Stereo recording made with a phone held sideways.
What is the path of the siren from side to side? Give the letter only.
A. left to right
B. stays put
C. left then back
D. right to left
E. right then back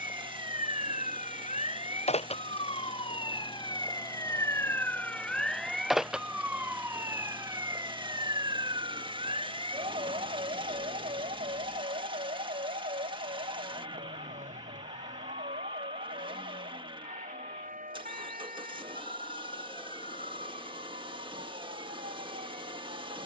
A.